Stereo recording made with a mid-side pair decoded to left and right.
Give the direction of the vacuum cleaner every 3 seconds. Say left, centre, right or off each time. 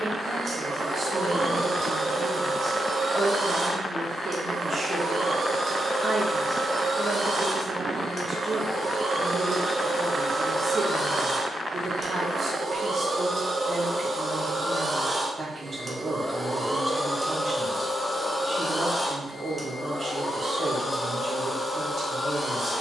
right, right, right, right, right, centre, left, left.